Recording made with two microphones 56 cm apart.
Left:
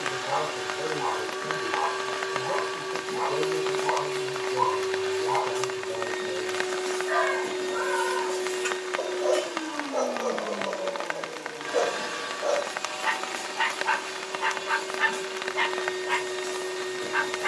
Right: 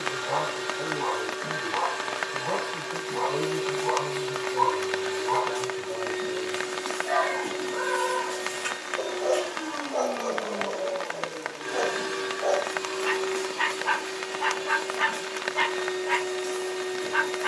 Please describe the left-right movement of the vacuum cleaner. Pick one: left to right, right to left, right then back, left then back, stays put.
right then back.